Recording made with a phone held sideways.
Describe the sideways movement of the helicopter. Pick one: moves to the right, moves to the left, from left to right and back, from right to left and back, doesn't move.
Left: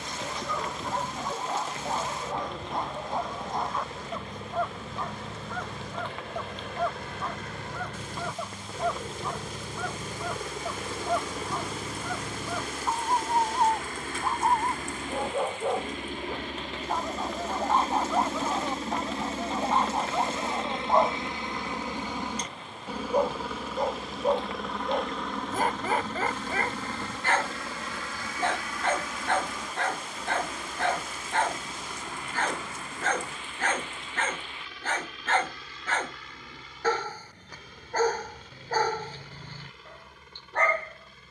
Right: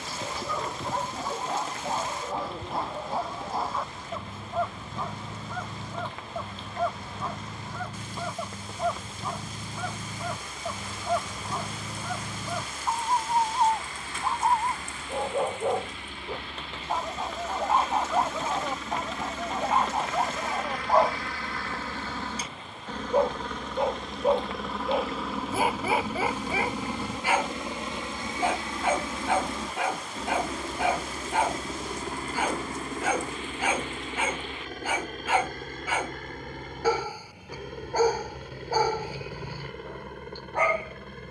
moves to the right.